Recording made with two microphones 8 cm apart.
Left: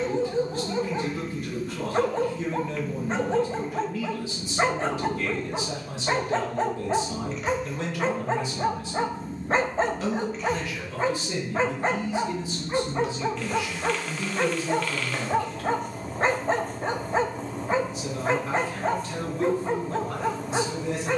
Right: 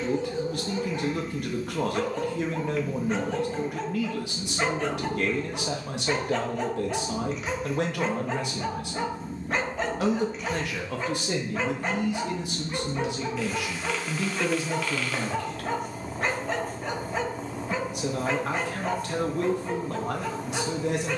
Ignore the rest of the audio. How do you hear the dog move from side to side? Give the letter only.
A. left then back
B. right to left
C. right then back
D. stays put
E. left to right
D.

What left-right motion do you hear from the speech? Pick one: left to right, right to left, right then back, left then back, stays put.
stays put.